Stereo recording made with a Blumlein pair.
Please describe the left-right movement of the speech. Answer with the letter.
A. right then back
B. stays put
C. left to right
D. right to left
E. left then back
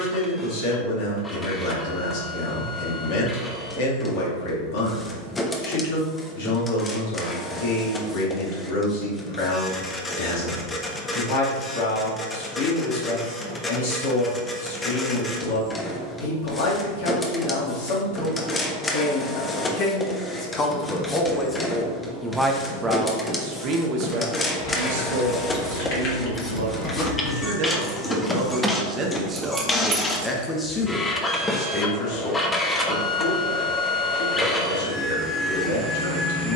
A.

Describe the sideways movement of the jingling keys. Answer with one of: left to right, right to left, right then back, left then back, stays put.
left to right.